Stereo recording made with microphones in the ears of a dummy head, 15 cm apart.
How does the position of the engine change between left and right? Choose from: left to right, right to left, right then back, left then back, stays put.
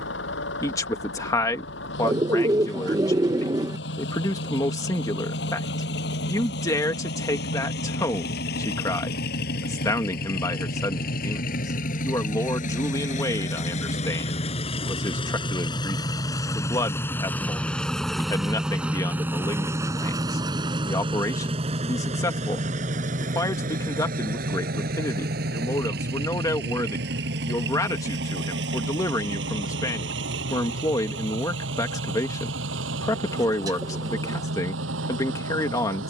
left to right.